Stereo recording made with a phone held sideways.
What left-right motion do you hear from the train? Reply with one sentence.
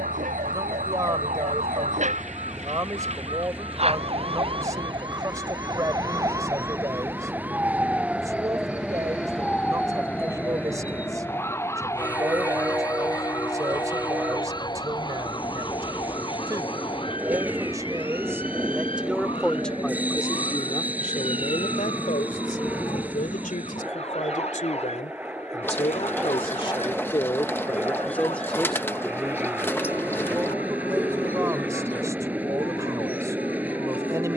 You can hear the train stay in one place.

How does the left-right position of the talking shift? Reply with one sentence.
In this clip you hear the talking move from right to left and back again.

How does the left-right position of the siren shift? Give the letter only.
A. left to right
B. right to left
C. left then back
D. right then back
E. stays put
B.